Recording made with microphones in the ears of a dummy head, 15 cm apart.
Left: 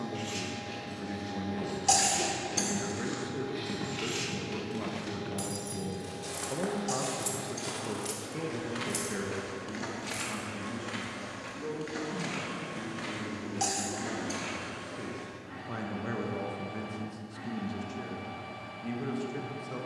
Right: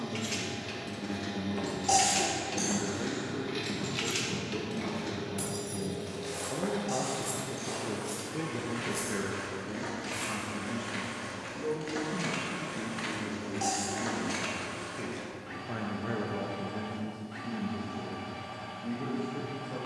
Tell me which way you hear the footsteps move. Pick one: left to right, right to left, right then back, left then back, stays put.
left then back.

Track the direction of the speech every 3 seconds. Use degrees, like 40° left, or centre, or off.
60° left, 50° left, 20° left, 20° right, 30° right, 30° left, 60° left.